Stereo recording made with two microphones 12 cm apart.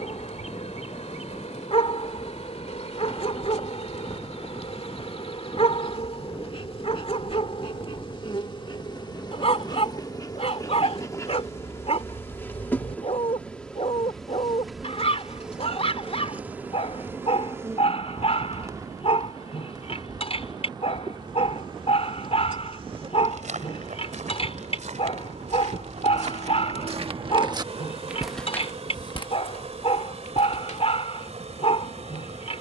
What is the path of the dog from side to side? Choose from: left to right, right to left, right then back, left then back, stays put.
stays put.